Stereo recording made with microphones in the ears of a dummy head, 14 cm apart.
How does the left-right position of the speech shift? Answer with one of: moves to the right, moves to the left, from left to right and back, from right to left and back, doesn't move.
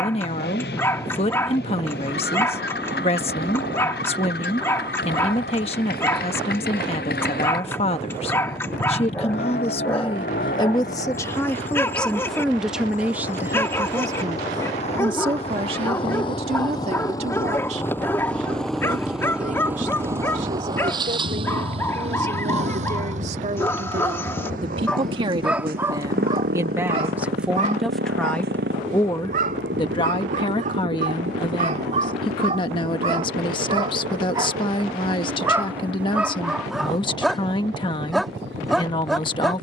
from left to right and back.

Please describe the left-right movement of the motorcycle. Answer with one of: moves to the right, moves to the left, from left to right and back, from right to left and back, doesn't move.
moves to the right.